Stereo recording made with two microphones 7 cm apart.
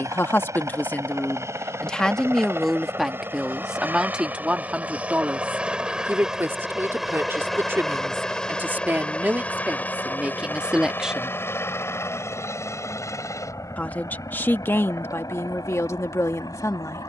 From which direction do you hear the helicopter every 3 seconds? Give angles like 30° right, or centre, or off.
40° right, 20° right, centre, 20° left, 40° left, 50° left.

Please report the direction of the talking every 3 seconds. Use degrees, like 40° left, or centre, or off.
20° left, 10° right, 30° right, 20° right, 30° left, 40° left.